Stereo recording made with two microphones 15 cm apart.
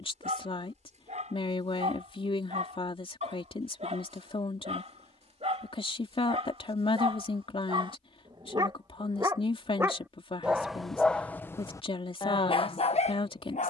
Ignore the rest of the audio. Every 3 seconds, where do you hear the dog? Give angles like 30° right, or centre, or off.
60° right, 50° right, 40° right, centre, 50° left.